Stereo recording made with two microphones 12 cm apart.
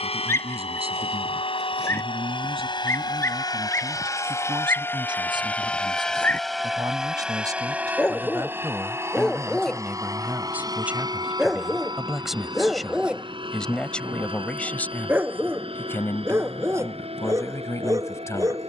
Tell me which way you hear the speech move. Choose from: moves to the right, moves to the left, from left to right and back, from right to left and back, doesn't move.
moves to the left.